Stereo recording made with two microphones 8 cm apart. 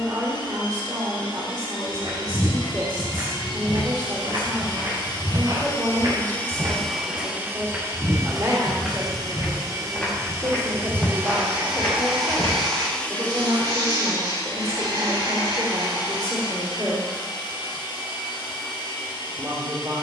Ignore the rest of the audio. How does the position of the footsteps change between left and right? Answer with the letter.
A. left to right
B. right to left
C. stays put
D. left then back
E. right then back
B.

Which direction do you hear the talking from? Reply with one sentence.
In this clip you hear the talking on the right.